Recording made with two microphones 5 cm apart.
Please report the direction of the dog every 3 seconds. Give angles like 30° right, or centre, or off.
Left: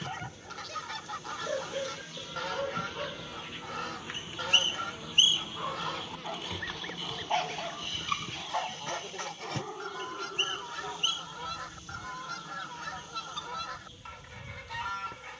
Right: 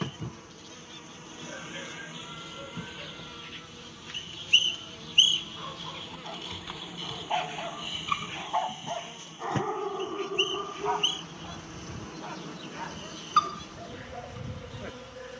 50° left, 30° left, centre, 40° right, 60° right.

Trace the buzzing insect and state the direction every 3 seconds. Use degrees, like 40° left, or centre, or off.
30° right, 10° left, 10° right, 40° right, 60° right.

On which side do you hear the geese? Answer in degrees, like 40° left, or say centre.
80° left.